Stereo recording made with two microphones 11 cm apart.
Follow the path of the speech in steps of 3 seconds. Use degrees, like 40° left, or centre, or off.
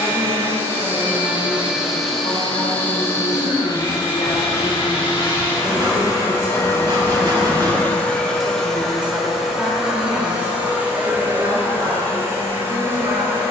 50° left, 40° left, 10° left, 30° right, 50° right.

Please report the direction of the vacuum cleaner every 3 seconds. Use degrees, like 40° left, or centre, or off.
10° right, 40° left, 20° left, 10° right, 20° right.